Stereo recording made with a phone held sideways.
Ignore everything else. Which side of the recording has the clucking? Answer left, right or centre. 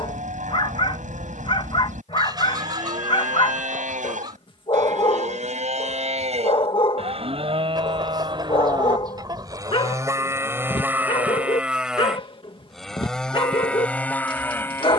right.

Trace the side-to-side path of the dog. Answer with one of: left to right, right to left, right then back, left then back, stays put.
stays put.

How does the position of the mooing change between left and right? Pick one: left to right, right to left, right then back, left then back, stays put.
right to left.